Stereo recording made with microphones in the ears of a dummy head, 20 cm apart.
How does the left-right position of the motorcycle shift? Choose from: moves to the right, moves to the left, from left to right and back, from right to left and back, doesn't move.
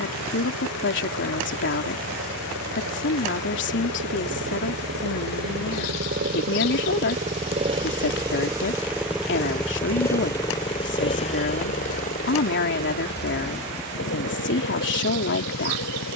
moves to the left.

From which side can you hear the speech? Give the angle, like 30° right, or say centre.
60° left.